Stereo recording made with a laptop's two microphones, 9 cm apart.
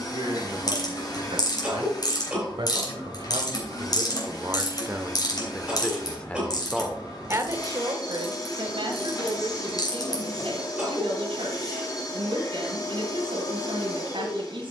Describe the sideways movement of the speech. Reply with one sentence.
You can hear the speech move from right to left and back again.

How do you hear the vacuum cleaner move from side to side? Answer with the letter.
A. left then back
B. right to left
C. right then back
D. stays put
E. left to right
D.